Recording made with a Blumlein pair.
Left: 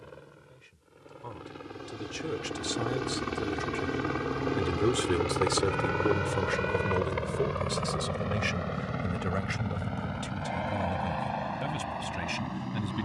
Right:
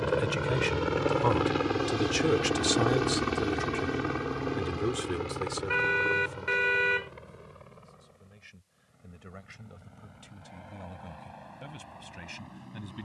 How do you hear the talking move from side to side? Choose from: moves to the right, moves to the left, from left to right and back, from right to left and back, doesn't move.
moves to the left.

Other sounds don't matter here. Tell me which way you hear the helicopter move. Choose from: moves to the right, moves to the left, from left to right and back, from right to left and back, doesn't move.
moves to the left.